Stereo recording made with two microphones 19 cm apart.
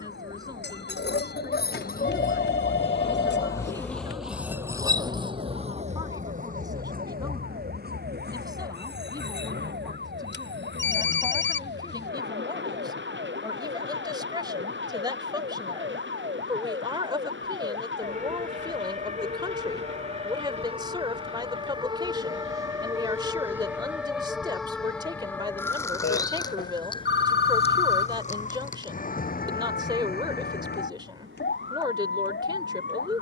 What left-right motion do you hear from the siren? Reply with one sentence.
In this clip you hear the siren move to the left.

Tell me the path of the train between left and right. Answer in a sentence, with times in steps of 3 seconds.
You can hear the train on the left from 0 s, in the centre from 3 s and on the right from 6 s.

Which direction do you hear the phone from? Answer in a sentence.
You can hear the phone on the left.